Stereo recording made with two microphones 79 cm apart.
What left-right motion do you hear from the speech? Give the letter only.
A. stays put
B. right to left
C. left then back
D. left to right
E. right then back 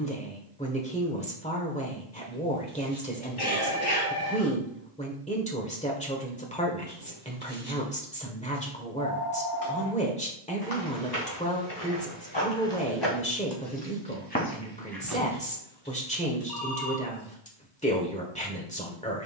A.